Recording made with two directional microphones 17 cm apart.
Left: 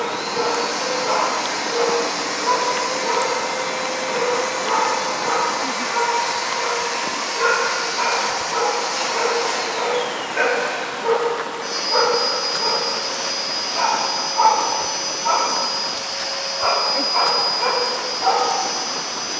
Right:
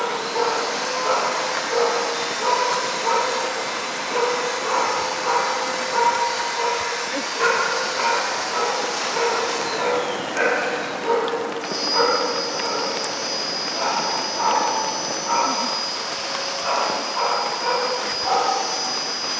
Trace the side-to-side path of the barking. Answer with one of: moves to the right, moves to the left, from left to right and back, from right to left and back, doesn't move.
moves to the left.